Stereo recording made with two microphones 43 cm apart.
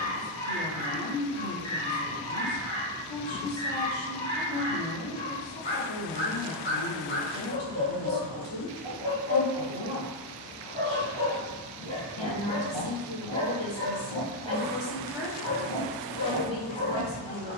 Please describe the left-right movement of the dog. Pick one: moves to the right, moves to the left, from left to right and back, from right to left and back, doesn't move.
doesn't move.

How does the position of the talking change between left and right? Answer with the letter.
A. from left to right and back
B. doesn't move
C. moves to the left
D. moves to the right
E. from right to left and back
B.